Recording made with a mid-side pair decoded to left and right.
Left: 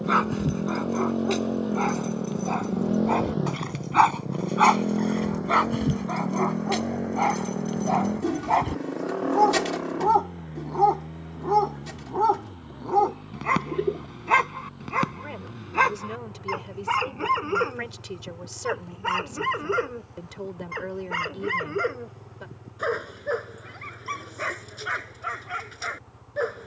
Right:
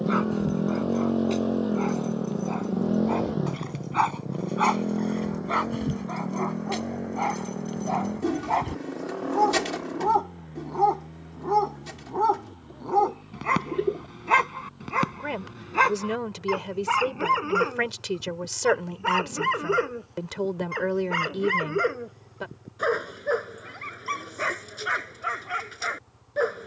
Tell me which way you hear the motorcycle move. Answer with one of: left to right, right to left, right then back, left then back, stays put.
right to left.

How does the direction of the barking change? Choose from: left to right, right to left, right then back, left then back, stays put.
left to right.